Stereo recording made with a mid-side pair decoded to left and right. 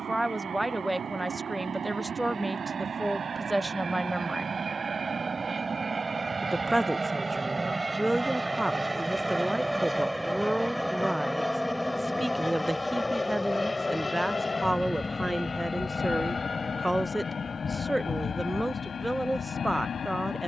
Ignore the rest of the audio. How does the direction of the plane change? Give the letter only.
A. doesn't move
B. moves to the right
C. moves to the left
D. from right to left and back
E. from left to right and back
C.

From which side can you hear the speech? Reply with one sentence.
You can hear the speech in the centre.